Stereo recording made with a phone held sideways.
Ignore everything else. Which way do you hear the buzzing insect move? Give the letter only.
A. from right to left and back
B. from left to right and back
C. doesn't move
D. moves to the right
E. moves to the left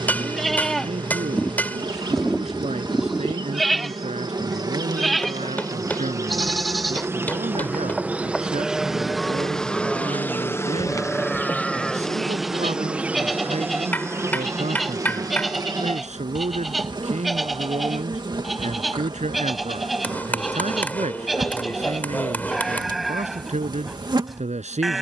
A.